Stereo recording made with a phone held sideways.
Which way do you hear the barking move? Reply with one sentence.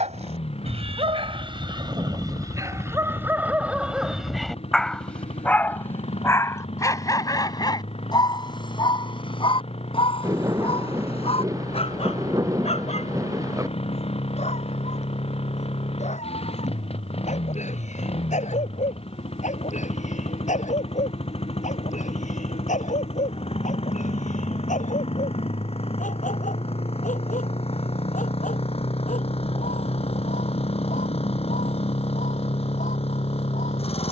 You can hear the barking move from right to left.